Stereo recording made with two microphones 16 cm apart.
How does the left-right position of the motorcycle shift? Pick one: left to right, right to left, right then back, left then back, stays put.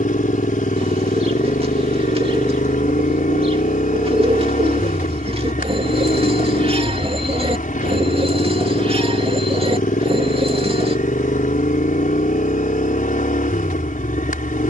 stays put.